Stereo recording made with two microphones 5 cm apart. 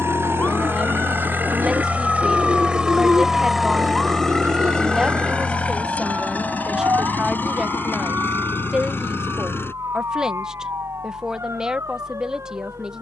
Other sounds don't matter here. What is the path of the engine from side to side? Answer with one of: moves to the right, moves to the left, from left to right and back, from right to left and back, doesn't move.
moves to the left.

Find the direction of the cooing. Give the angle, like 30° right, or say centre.
70° right.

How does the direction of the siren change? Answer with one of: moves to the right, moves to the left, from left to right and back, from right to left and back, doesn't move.
moves to the right.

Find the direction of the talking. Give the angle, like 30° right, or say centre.
10° right.